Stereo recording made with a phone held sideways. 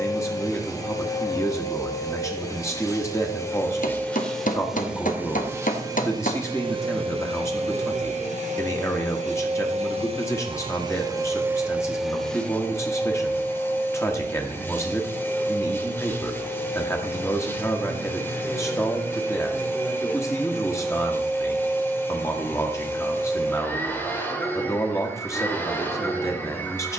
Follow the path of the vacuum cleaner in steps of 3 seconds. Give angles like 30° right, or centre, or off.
20° left, centre, 40° right, 30° right, 10° left, 10° left, 10° left, 10° left, 10° left.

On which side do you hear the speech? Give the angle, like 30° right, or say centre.
20° left.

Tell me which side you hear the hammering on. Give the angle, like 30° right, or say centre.
70° left.